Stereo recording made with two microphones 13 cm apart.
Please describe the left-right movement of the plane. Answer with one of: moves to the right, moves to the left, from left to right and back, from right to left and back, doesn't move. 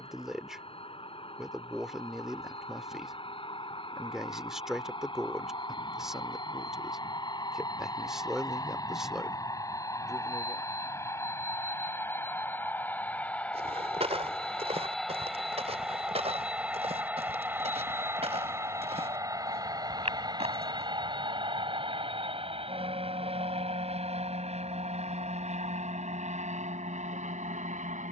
moves to the right.